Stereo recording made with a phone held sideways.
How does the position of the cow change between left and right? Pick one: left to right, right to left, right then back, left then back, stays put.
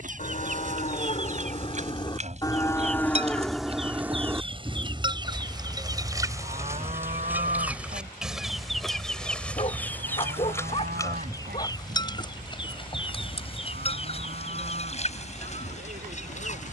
left to right.